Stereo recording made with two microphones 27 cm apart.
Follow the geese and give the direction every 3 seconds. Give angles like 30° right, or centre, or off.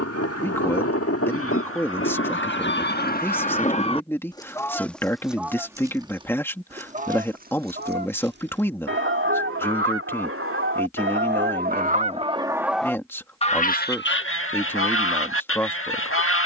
50° left, 10° left, 30° right, 40° right, 20° left, 50° left.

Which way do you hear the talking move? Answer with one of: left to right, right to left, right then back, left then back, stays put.
stays put.